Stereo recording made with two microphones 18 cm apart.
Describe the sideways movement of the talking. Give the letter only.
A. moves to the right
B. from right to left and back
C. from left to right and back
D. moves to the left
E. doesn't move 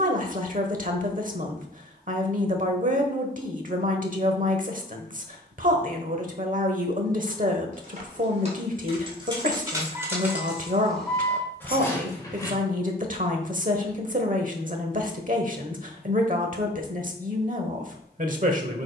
E.